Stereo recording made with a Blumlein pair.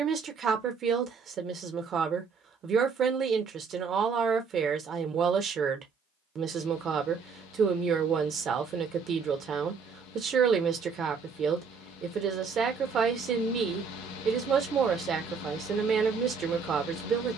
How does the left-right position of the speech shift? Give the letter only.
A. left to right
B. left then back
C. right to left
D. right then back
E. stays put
E.